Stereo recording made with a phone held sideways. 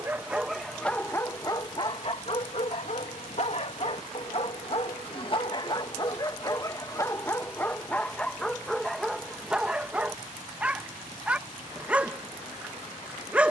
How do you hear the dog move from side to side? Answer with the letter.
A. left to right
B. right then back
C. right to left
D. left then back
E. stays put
D.